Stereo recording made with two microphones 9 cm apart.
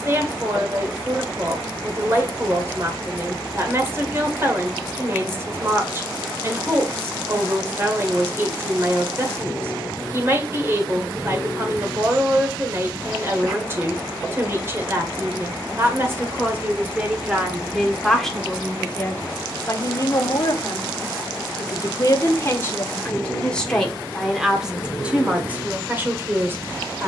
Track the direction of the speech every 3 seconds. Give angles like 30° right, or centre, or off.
30° right, 30° right, 30° right, 30° right, 30° right, 20° right, 20° left, 20° left, 20° right.